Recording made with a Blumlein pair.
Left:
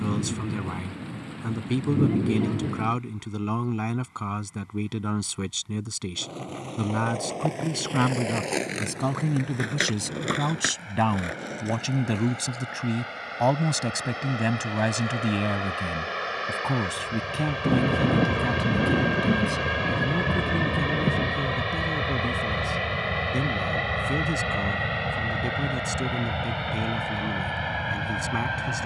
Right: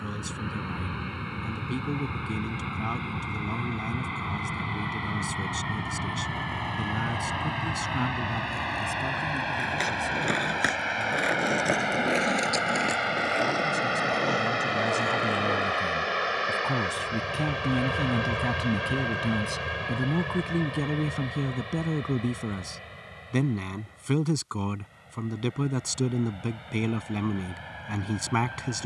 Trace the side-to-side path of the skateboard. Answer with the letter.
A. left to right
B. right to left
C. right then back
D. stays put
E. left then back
A.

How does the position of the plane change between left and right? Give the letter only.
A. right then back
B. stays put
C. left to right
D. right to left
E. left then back
D.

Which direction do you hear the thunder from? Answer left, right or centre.
left.